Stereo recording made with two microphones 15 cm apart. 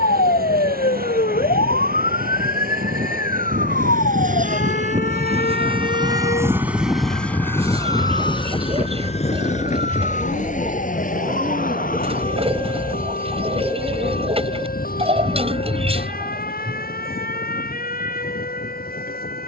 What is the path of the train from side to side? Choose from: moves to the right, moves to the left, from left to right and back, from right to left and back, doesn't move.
moves to the left.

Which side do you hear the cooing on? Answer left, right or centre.
right.